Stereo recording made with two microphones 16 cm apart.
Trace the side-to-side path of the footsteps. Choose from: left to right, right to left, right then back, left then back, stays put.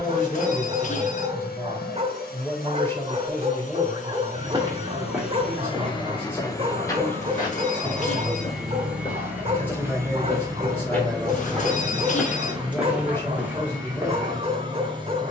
left then back.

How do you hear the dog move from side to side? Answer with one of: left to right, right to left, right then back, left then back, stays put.
stays put.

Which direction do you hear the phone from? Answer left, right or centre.
left.